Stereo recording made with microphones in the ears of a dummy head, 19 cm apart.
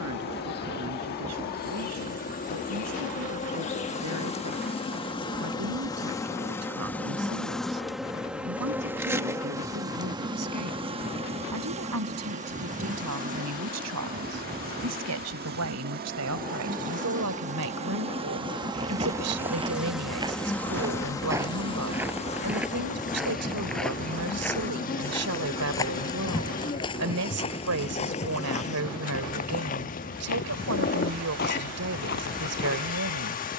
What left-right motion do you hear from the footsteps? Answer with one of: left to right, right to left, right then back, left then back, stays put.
right to left.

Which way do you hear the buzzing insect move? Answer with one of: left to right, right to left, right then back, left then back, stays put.
right then back.